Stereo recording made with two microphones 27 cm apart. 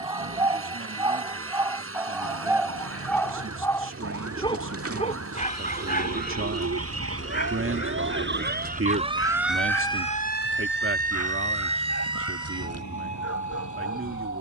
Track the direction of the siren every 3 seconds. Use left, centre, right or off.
right, right, right, left, left.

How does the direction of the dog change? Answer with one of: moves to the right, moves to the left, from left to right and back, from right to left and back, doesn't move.
moves to the left.